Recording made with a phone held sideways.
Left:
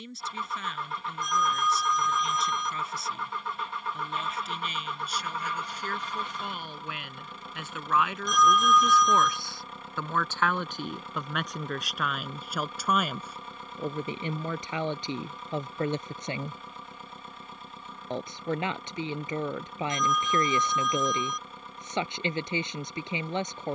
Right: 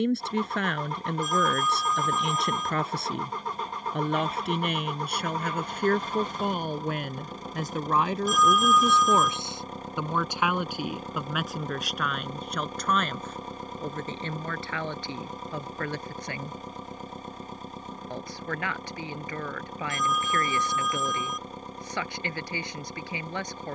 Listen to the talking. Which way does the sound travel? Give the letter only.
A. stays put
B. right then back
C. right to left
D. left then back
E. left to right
C.